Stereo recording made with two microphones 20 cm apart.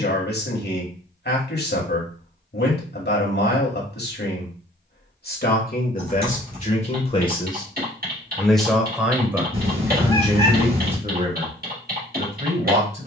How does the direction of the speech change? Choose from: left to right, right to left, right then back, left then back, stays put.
left to right.